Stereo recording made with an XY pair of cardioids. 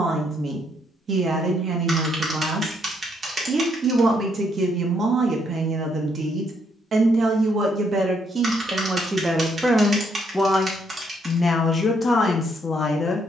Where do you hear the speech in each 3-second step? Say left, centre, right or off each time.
right, right, right, centre, left.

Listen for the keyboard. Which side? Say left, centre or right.
right.